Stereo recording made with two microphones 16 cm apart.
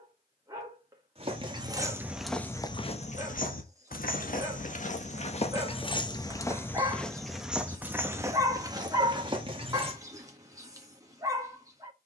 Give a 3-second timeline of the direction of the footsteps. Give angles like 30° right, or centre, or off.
centre, 50° left, centre, 30° right.